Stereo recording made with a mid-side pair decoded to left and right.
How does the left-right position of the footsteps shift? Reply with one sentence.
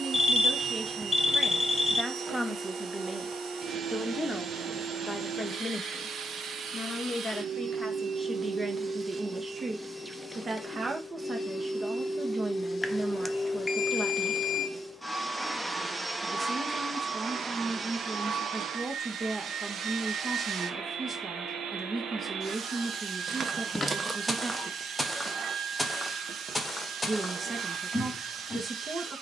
In this clip you hear the footsteps move to the left.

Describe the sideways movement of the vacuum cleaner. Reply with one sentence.
In this clip you hear the vacuum cleaner move from right to left and back again.